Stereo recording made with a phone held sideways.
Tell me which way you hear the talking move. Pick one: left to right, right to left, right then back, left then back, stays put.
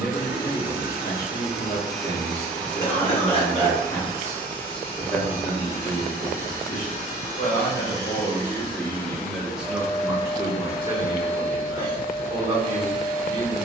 left to right.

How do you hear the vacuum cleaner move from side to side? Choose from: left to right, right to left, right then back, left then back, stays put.
left then back.